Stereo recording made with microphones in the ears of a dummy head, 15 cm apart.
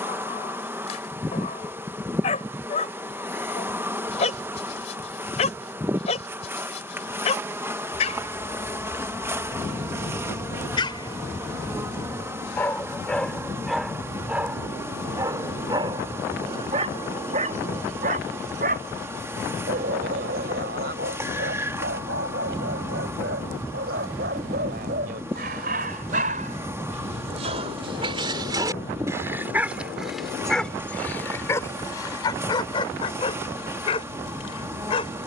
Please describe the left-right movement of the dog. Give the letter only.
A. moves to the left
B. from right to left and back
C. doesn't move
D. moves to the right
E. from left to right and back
E.